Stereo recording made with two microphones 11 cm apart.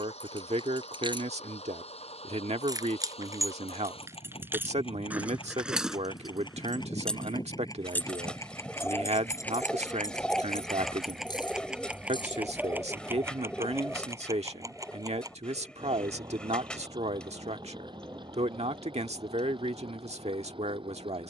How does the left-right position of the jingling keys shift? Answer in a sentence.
In this clip you hear the jingling keys move to the left.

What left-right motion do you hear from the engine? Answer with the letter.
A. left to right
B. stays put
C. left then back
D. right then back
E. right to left
A.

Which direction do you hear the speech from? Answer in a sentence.
You can hear the speech on the right.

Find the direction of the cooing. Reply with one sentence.
You can hear the cooing in the centre.